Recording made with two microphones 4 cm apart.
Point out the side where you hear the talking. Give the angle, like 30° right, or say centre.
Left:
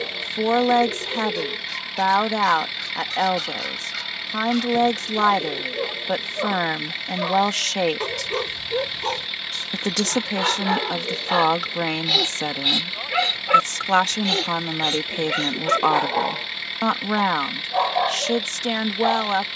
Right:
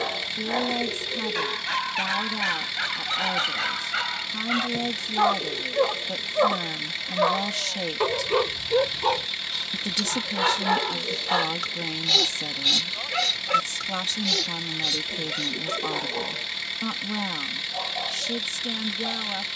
80° left.